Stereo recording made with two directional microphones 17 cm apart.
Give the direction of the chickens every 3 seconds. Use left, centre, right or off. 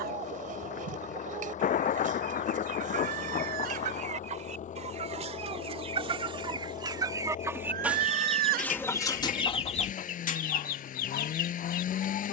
right, right, centre, left.